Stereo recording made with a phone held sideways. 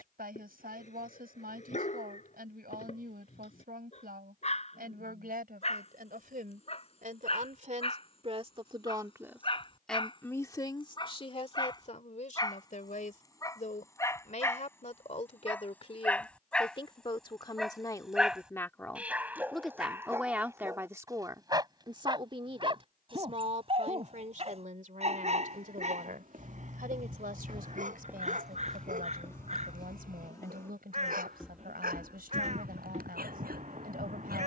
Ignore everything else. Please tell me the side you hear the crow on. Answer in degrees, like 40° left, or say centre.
50° right.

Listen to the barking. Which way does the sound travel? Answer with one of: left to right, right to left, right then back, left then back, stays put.
left to right.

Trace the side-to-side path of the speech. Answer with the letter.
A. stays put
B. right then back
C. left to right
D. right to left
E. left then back
E.